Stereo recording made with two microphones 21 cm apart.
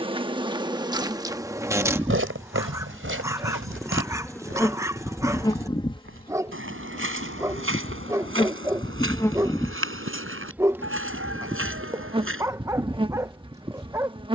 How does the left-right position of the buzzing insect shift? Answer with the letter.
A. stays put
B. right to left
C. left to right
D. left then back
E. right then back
D.